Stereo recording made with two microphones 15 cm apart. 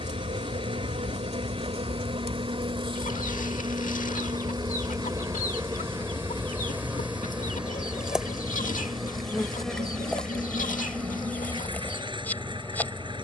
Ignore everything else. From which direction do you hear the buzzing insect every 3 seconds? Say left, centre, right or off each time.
right, right, centre, centre, centre.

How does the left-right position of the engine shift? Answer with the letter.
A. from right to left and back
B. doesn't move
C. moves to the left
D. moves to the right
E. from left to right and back
B.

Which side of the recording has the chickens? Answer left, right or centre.
left.